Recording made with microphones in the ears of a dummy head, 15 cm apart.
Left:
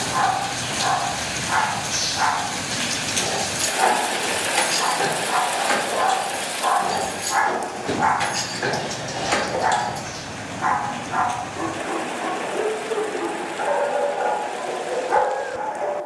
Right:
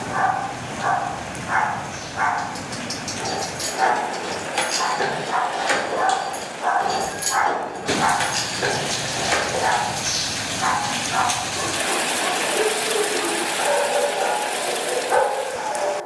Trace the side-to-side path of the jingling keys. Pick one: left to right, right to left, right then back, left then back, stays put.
right then back.